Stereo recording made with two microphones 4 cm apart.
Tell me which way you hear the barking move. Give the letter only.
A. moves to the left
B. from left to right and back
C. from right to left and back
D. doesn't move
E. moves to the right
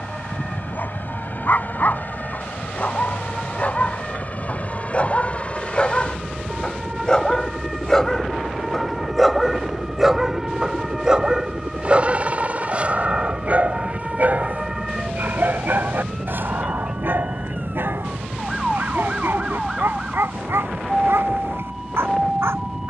E.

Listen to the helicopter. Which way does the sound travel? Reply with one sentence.
In this clip you hear the helicopter travel towards the right.